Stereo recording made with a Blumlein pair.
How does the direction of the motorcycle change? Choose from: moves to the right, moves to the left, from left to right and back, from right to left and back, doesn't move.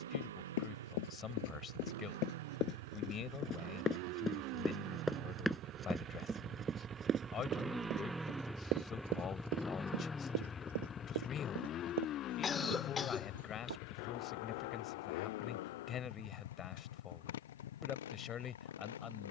moves to the left.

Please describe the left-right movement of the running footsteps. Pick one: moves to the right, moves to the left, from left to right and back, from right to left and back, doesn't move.
moves to the right.